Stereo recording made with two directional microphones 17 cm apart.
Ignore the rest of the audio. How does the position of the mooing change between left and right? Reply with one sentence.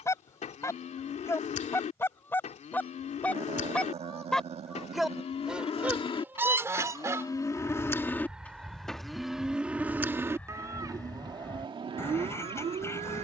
In this clip you hear the mooing go from the left side to the right.